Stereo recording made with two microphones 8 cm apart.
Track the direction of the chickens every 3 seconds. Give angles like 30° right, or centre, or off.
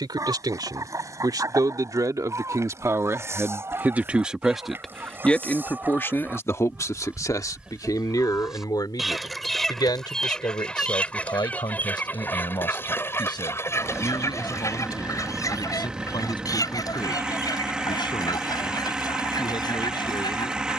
40° right, 30° right, 10° right, 10° left, 30° left, 50° left, 60° left.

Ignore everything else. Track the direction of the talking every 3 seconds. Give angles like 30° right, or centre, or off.
50° right, 10° right, 50° left, 70° left, 70° left, 80° left, 80° left.